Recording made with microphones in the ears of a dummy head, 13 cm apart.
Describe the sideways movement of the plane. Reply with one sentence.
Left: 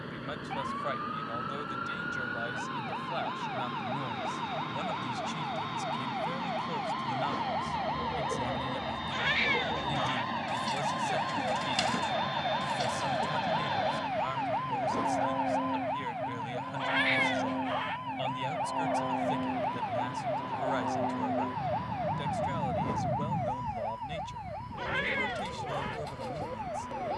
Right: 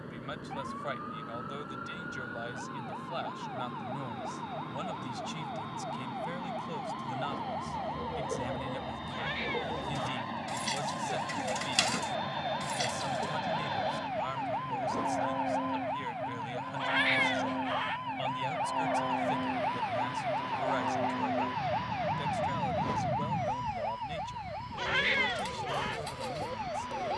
In this clip you hear the plane go from the left side to the right.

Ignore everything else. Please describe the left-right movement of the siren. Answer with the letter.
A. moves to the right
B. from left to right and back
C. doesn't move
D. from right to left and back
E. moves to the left
A.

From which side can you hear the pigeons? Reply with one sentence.
In this clip you hear the pigeons on the right.